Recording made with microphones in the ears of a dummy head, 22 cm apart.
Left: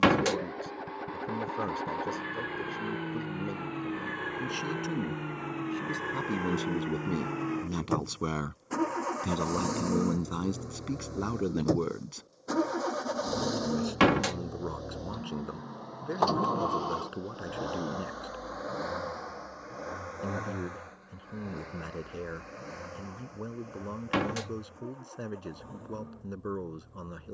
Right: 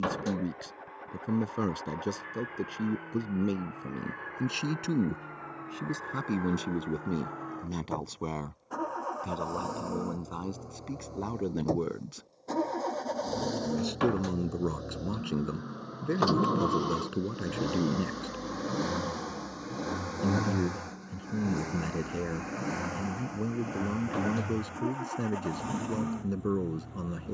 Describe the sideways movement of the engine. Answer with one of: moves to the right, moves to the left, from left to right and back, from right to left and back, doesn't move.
moves to the right.